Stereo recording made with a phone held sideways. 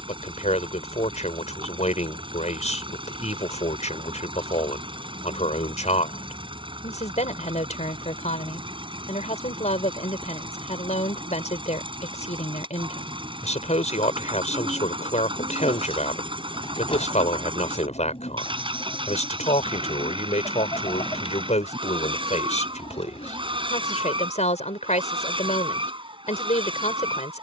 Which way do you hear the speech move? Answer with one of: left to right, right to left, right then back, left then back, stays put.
stays put.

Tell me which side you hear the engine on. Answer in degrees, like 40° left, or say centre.
30° right.